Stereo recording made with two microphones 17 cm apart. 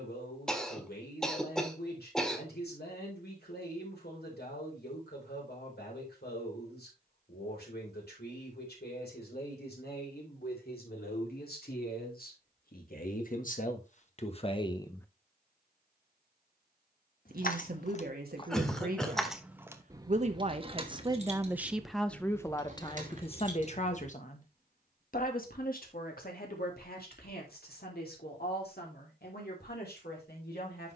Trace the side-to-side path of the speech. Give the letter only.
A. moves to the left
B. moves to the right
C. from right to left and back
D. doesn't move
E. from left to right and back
E.